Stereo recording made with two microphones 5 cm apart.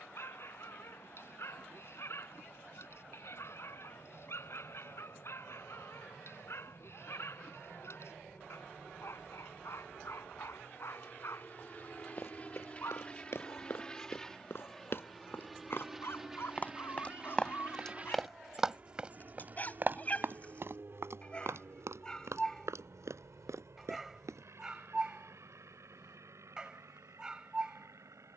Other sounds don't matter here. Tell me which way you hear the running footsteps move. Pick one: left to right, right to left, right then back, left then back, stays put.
left to right.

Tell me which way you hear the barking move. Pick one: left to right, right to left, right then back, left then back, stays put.
left to right.